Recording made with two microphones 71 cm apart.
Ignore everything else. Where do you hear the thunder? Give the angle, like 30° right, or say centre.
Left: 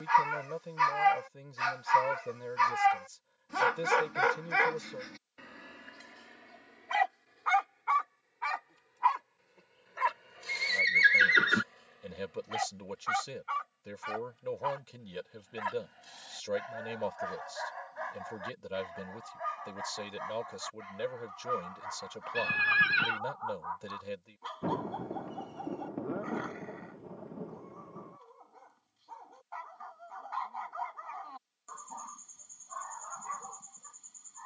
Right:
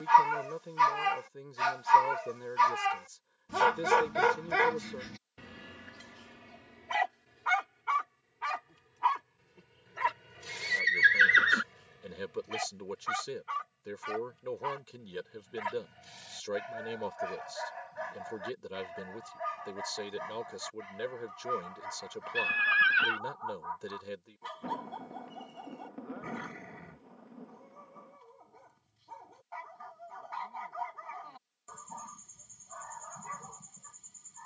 70° left.